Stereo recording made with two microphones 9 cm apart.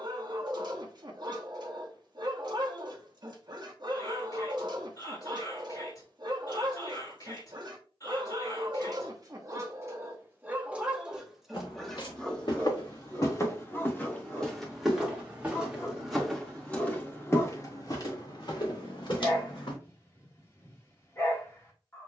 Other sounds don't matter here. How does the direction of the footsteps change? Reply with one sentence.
In this clip you hear the footsteps move from left to right and back again.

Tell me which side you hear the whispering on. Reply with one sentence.
In this clip you hear the whispering on the left.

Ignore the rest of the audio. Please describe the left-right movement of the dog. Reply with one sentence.
In this clip you hear the dog move from right to left.